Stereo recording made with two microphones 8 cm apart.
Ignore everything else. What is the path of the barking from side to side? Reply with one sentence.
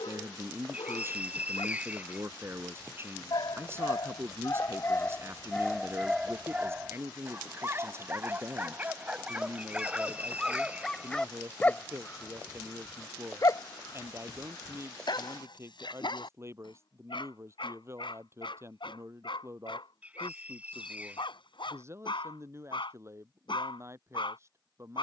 In this clip you hear the barking go right and come back.